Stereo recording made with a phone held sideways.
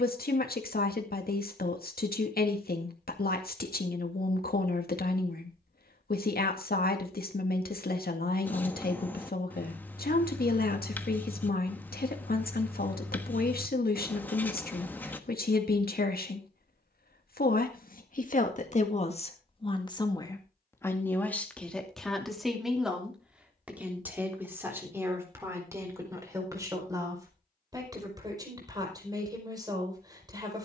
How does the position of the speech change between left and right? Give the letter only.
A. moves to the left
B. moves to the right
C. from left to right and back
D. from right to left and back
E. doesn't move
B.